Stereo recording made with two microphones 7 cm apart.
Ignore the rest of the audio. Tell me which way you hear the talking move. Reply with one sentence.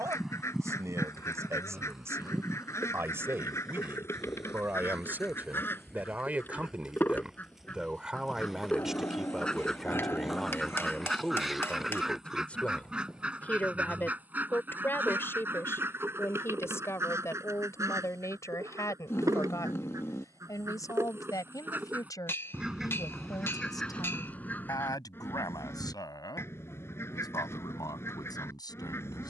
In this clip you hear the talking move from right to left.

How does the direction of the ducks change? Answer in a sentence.
You can hear the ducks move from left to right and back again.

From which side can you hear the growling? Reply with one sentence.
In this clip you hear the growling on the left.